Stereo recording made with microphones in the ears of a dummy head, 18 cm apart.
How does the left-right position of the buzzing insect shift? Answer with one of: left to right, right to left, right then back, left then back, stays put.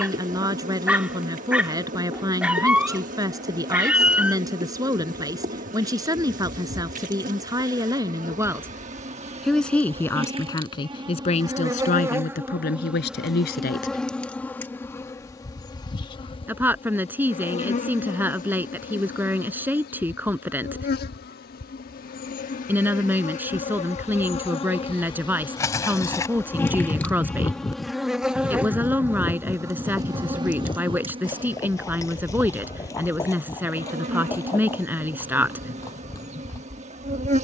left then back.